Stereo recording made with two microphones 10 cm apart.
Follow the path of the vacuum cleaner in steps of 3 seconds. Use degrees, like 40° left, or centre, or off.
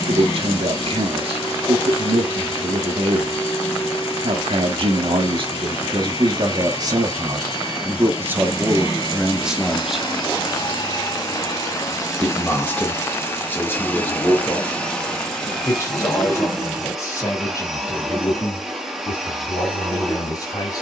80° left, 80° left, 70° left, 50° left, 20° left, centre, 10° right.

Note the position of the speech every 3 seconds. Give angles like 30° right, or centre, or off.
60° right, 60° right, 30° right, 10° right, 20° left, 30° left, 30° left.